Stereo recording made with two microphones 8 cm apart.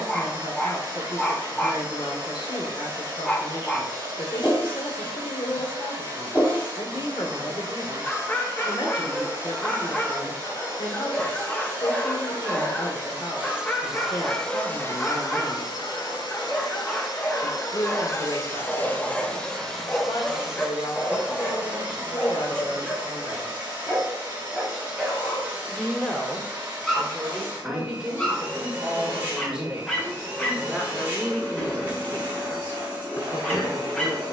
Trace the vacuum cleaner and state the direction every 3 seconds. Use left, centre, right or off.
right, right, right, right, centre, left, centre, right, right, right, right, right.